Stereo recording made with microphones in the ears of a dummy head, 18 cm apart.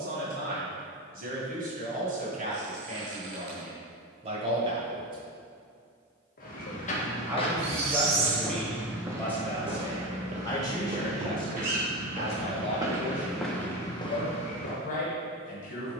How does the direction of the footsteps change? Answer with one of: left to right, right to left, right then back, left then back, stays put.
right then back.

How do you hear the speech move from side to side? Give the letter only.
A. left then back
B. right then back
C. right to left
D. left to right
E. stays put
C.